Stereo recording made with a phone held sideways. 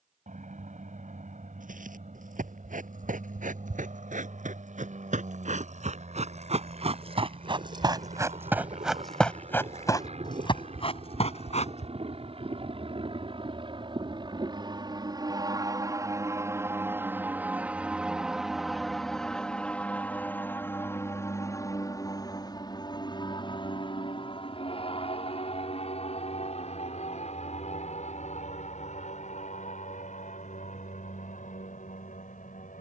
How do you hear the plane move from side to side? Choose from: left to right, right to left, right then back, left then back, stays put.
right to left.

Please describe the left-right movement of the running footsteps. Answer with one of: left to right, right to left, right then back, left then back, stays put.
right to left.